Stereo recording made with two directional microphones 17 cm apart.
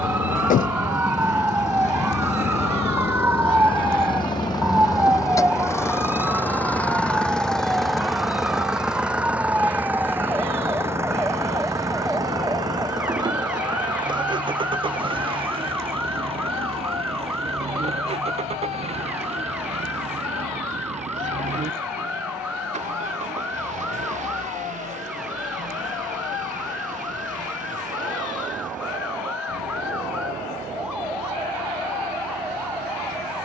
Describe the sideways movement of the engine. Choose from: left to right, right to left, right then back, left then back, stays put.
left to right.